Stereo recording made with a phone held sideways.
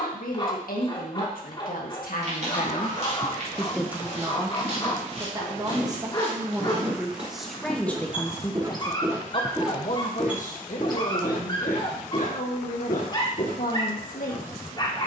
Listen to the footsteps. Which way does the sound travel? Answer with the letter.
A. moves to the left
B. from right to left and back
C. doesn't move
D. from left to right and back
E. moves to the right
A.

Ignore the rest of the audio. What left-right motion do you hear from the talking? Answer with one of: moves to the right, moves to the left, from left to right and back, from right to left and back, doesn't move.
from left to right and back.